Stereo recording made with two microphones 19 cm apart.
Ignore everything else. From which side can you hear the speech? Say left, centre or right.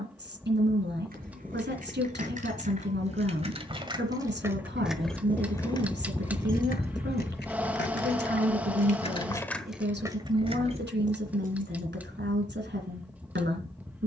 right.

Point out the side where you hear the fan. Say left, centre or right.
centre.